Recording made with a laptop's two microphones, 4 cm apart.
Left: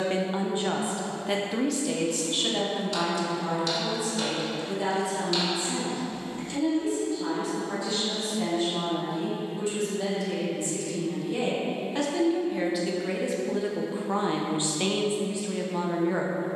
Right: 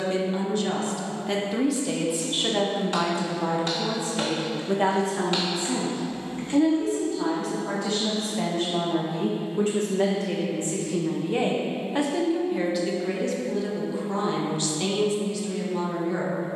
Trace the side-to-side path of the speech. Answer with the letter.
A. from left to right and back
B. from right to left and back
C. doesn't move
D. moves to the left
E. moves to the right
A.